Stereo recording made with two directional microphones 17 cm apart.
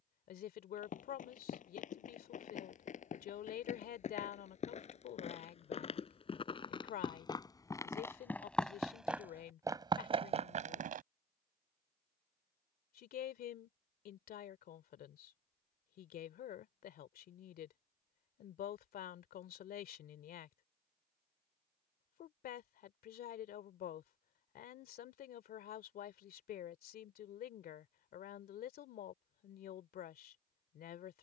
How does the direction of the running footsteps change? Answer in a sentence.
You can hear the running footsteps go from the left side to the right.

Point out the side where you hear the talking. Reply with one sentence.
In this clip you hear the talking on the left.